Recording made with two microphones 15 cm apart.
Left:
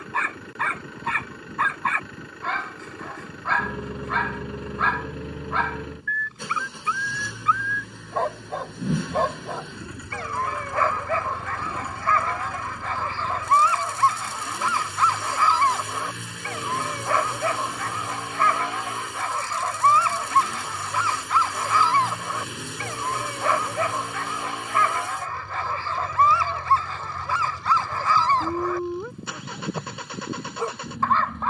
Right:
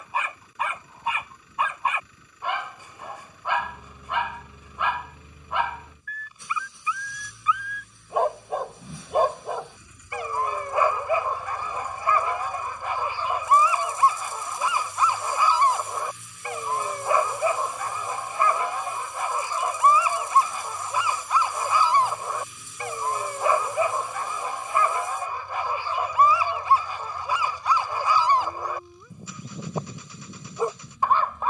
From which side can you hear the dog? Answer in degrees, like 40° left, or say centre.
10° right.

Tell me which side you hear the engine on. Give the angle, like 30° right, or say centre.
80° left.